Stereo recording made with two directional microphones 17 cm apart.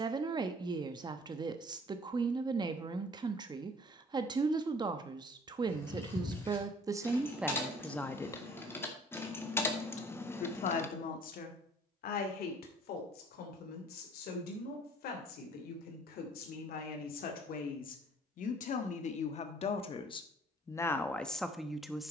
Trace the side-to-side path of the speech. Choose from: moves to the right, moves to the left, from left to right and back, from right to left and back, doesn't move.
from right to left and back.